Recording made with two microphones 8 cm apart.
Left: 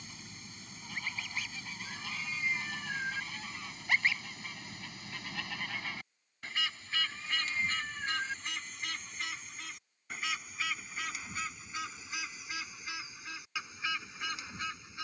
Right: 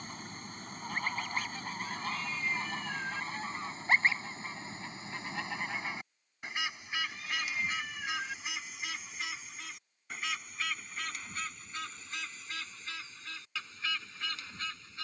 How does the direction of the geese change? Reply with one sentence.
In this clip you hear the geese move from right to left.